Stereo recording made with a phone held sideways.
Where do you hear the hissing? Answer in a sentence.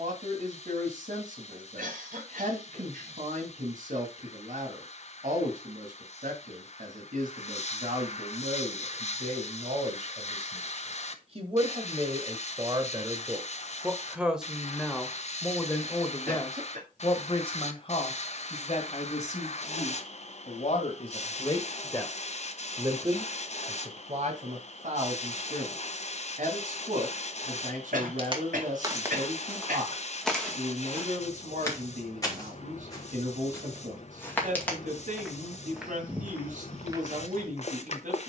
In this clip you hear the hissing on the left.